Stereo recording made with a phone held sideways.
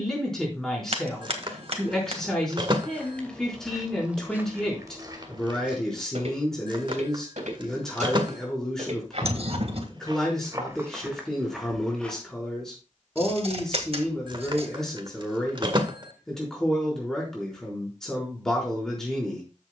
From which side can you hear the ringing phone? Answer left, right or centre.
right.